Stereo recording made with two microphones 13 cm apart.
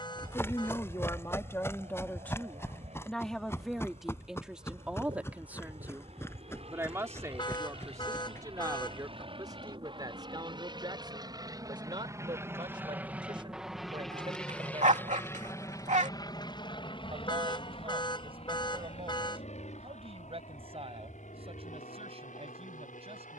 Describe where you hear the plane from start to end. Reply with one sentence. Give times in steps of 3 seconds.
You can hear the plane on the right from 0 s, in the centre from 12 s and on the left from 15 s.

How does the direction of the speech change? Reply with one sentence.
In this clip you hear the speech move from left to right.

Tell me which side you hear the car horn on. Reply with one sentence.
You can hear the car horn on the left.